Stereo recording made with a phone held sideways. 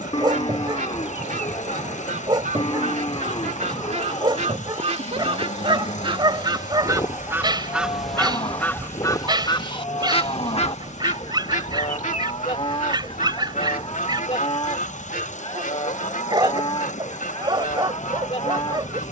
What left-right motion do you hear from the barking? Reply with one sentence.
You can hear the barking stay in one place.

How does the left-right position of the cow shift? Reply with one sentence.
In this clip you hear the cow stay in one place.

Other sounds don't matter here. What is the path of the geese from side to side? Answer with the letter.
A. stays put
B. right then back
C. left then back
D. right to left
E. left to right
D.